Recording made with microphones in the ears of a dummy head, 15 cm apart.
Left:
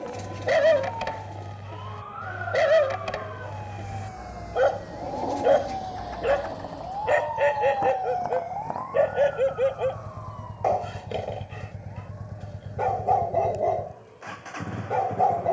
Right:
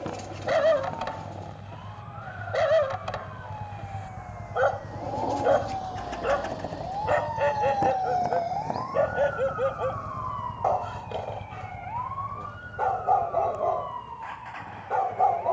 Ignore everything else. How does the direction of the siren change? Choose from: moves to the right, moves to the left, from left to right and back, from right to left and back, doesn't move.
moves to the right.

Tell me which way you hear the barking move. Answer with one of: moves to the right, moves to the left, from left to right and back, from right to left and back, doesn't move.
doesn't move.